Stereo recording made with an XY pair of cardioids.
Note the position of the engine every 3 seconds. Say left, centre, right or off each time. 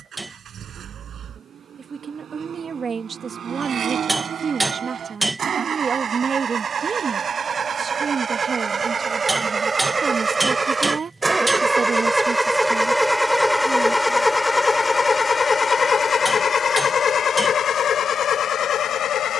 right, right, right, right, centre, left, left.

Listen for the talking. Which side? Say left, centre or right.
right.